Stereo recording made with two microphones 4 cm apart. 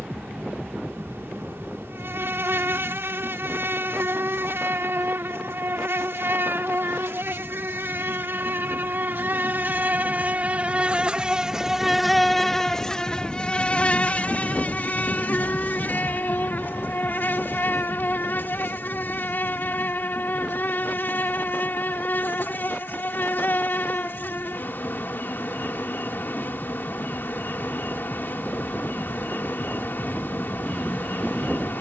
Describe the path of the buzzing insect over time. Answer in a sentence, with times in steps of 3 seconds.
You can hear the buzzing insect on the right from 0 s and on the left from 12 s.